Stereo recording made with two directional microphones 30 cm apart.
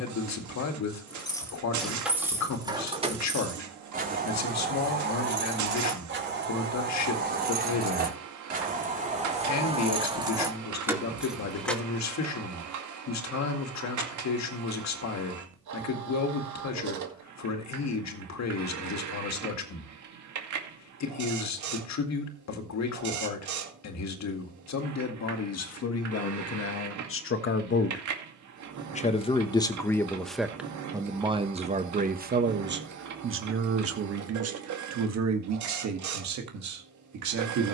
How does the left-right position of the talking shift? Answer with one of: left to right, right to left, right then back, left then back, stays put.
left to right.